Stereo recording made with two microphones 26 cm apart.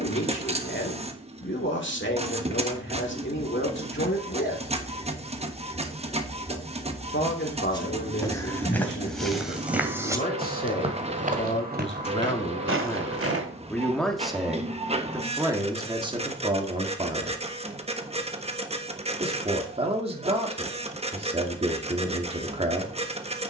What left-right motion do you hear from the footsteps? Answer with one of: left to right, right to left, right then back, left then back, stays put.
left to right.